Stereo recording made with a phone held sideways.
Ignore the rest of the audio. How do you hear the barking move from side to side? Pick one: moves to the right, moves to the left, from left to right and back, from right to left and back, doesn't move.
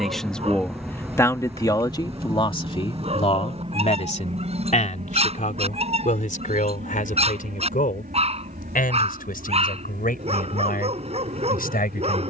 doesn't move.